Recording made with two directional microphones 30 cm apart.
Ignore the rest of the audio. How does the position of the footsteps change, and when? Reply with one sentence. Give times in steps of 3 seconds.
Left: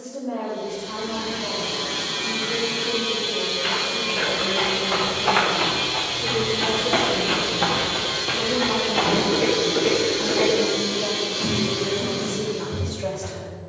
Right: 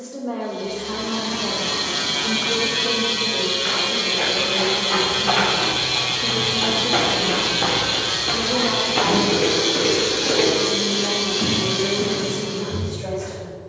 You can hear the footsteps not at all from 0 s, on the left from 3 s, in the centre from 6 s and on the right from 9 s.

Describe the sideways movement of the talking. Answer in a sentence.
You can hear the talking move to the left.